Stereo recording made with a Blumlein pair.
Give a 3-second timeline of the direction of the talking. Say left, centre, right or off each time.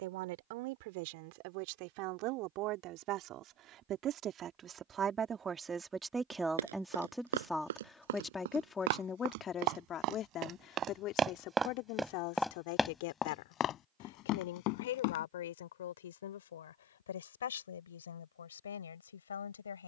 right, right, centre, left, left, left, left.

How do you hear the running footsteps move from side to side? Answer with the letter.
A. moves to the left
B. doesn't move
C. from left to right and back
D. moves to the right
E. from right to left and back
A.